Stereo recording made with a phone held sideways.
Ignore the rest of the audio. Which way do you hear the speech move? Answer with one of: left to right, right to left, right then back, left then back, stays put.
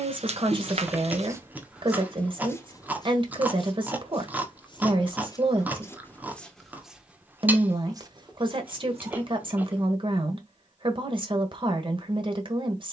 stays put.